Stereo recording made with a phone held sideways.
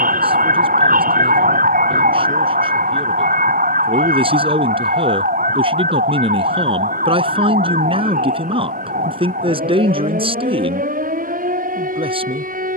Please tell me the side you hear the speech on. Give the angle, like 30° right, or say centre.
40° right.